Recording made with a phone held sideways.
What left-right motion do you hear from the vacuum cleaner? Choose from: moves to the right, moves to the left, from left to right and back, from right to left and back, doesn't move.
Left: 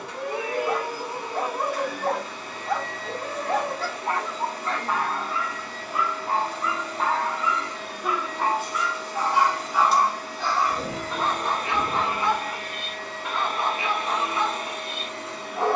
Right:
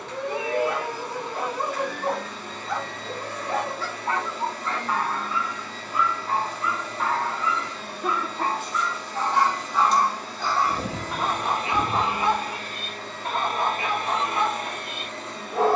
doesn't move.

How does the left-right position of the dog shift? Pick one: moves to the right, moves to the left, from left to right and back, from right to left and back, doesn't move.
moves to the right.